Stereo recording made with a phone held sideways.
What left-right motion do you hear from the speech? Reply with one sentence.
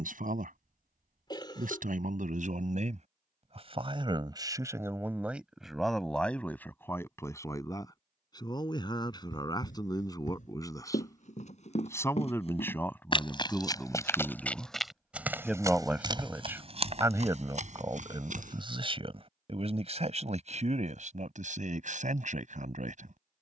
In this clip you hear the speech go left and come back.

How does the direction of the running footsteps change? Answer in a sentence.
You can hear the running footsteps move from left to right.